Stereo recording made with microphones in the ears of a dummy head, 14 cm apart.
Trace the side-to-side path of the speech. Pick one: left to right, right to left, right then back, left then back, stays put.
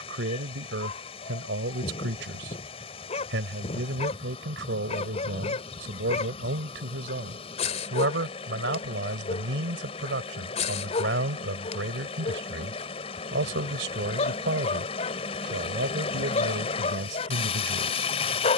stays put.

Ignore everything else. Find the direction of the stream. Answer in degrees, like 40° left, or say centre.
40° left.